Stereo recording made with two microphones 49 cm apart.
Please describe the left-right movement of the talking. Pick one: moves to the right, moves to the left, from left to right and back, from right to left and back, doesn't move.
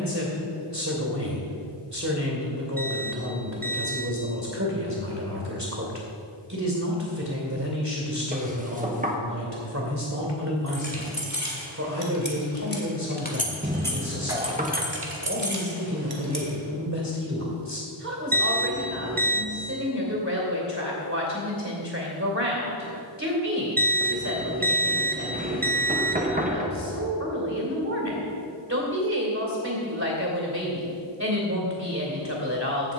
doesn't move.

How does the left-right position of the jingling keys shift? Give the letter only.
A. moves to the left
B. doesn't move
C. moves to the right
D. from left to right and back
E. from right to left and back
C.